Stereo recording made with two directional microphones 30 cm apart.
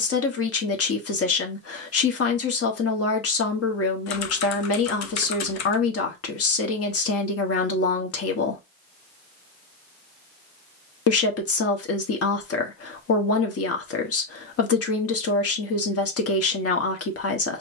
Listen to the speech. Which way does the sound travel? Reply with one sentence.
You can hear the speech stay put.